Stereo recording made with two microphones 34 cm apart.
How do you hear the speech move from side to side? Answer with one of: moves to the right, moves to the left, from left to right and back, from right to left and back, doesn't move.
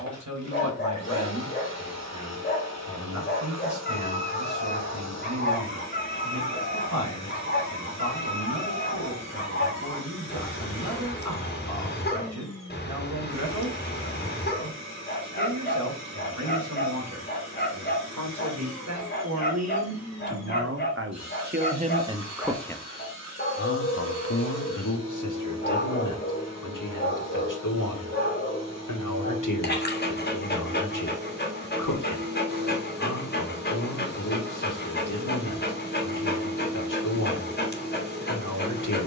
moves to the left.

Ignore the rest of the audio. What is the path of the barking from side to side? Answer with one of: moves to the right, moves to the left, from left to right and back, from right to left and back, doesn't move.
doesn't move.